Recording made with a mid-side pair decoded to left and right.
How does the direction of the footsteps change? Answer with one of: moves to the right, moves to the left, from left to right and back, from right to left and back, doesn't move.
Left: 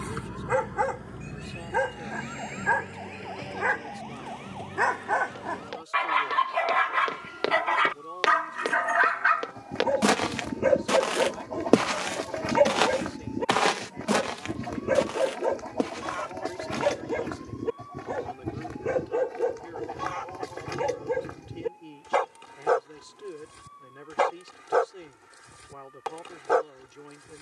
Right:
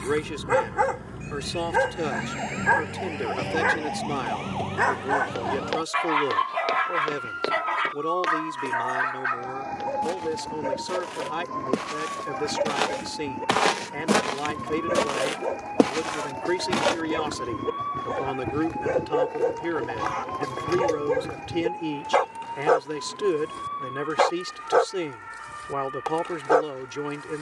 from right to left and back.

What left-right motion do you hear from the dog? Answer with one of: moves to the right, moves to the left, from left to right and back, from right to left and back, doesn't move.
from right to left and back.